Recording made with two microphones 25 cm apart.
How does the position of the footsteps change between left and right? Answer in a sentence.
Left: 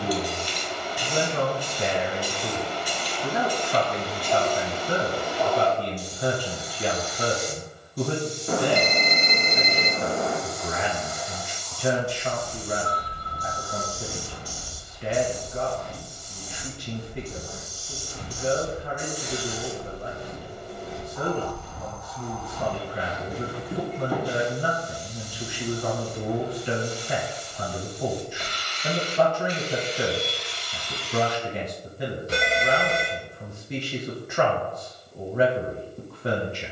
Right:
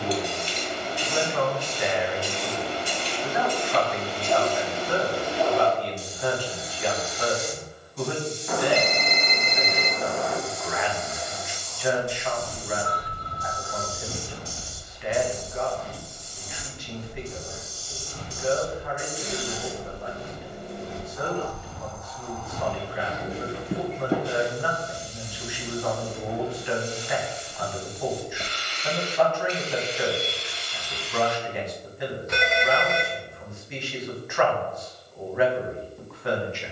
In this clip you hear the footsteps move from right to left and back again.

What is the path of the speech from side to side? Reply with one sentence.
In this clip you hear the speech stay put.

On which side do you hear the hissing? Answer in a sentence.
In this clip you hear the hissing on the right.